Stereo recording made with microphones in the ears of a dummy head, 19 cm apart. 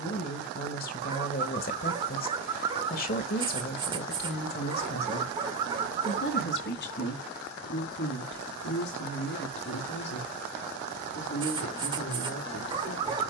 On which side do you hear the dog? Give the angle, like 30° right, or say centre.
20° right.